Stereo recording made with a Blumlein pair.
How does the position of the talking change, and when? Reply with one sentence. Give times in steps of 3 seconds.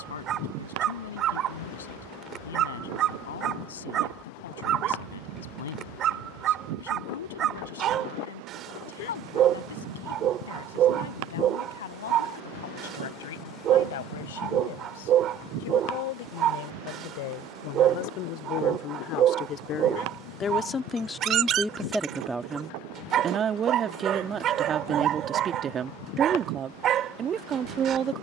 In this clip you hear the talking on the left from 0 s, in the centre from 21 s and on the right from 24 s.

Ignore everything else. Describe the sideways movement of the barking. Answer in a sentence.
In this clip you hear the barking stay put.